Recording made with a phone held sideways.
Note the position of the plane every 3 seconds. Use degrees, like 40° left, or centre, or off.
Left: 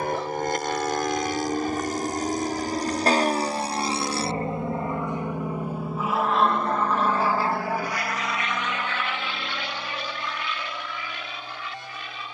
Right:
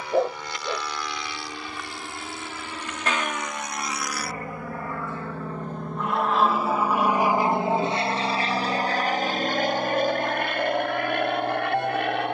50° left, 30° left, 20° right, 50° right.